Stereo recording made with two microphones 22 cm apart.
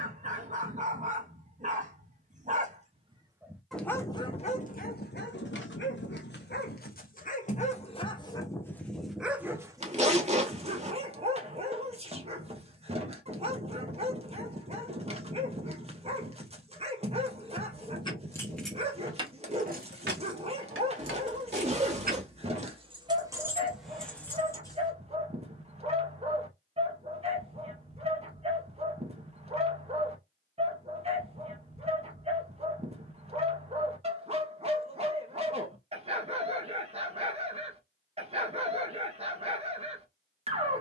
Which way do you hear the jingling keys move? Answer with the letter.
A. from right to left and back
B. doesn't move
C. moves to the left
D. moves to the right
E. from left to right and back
E.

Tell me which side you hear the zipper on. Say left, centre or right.
right.